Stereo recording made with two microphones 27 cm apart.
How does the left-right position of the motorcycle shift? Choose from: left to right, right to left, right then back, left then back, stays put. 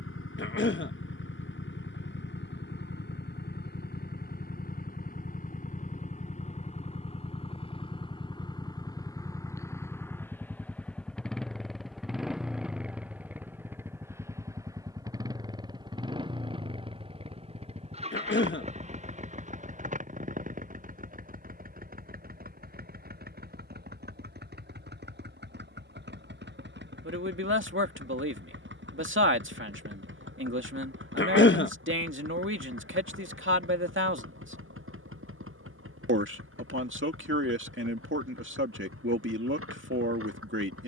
left to right.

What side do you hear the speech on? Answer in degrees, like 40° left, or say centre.
50° right.